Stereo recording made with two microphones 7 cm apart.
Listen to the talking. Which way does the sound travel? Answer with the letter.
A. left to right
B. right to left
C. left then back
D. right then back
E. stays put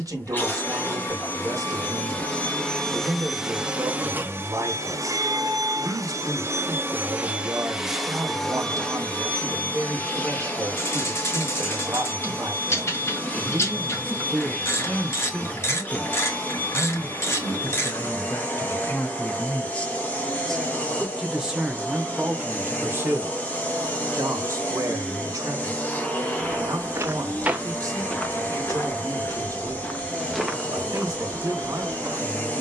C.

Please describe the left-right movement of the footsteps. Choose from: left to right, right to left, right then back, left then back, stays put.
left then back.